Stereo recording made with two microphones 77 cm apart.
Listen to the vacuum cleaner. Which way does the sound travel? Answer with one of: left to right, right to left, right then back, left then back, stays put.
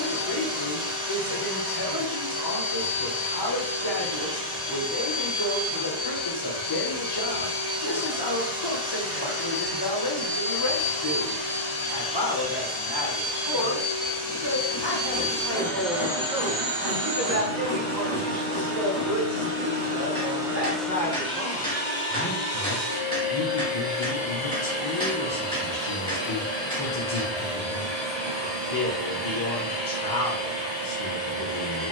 right then back.